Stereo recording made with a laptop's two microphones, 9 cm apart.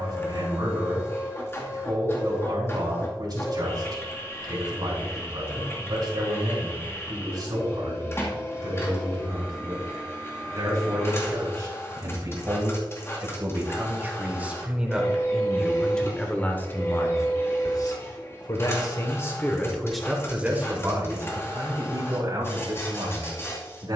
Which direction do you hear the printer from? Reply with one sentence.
You can hear the printer on the left.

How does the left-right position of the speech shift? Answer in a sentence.
You can hear the speech move from right to left and back again.